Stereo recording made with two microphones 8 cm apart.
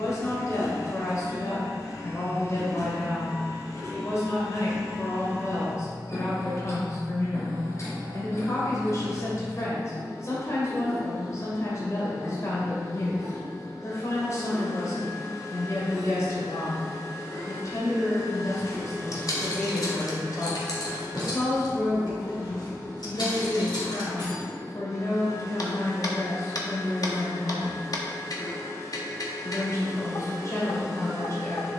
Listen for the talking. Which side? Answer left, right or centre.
left.